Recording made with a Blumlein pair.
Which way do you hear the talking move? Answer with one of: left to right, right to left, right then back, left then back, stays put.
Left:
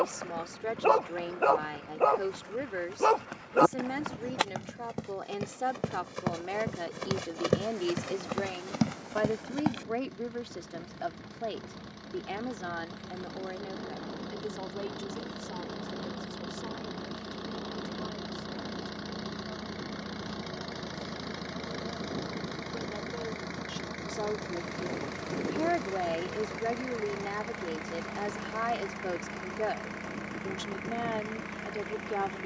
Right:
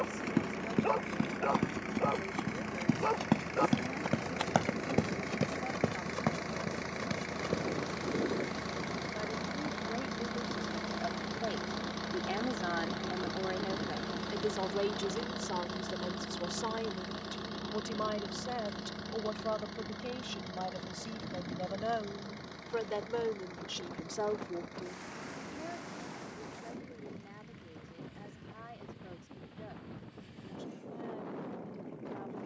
right then back.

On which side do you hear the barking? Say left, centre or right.
left.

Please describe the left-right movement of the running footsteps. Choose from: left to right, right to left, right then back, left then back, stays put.
right to left.